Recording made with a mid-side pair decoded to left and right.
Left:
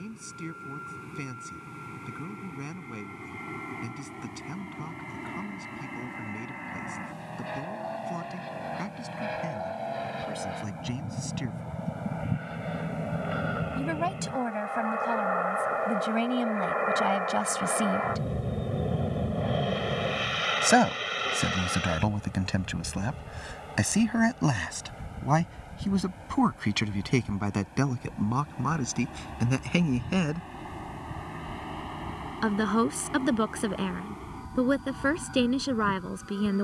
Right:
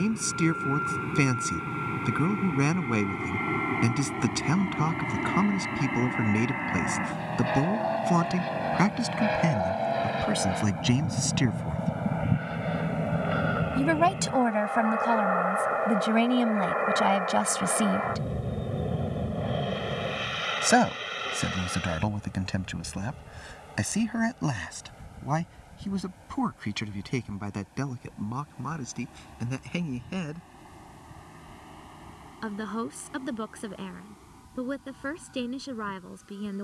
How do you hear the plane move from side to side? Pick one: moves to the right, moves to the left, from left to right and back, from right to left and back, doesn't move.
moves to the left.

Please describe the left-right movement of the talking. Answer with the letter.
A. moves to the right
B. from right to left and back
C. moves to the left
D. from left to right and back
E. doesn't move
C.